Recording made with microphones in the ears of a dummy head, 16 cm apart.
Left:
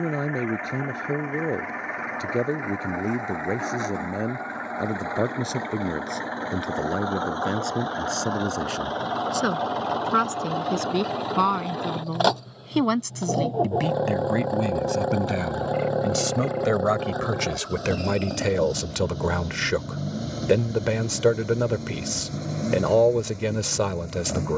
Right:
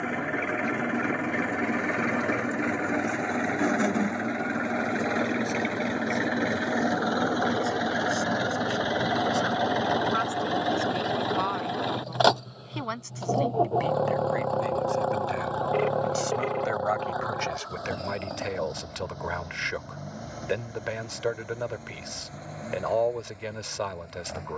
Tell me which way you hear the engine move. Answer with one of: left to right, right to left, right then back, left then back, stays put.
right to left.